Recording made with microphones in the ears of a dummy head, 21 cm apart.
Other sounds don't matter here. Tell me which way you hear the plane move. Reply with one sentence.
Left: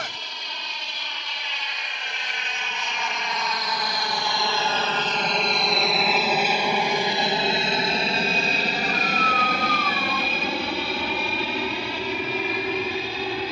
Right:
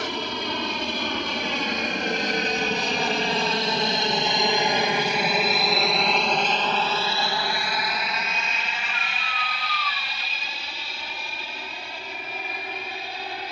In this clip you hear the plane move to the left.